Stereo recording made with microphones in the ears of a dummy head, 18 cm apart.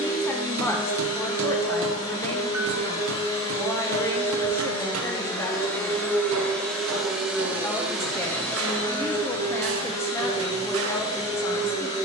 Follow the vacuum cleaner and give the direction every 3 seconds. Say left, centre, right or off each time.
left, left, centre, left.